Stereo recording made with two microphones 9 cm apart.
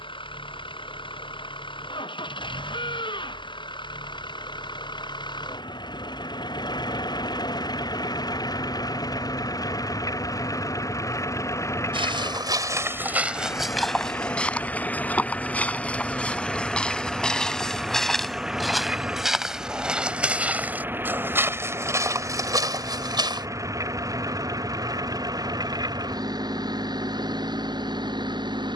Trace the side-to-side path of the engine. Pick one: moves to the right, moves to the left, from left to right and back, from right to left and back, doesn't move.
moves to the right.